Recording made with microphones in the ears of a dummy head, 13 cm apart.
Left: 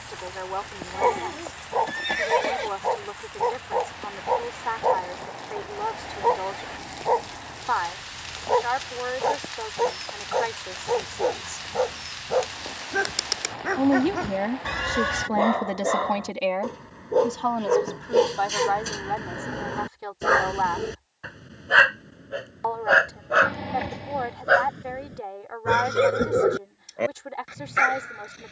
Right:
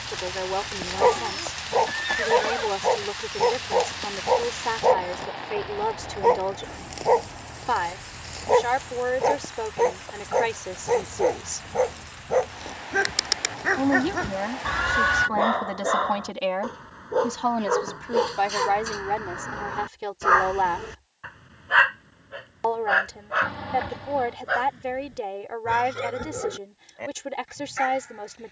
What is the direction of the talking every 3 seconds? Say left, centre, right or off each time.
right, right, right, right, left, centre, right, right, right, right.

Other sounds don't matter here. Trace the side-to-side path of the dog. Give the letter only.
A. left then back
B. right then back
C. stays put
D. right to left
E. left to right
D.